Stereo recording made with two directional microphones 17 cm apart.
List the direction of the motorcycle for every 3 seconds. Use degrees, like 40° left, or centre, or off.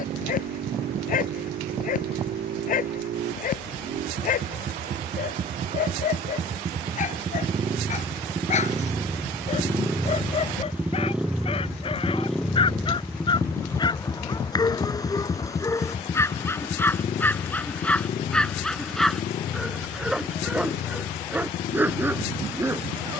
60° right, 50° right, 30° right, 10° right, 10° left, 30° left, 50° left, 60° left.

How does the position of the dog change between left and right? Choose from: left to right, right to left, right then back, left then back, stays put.
left to right.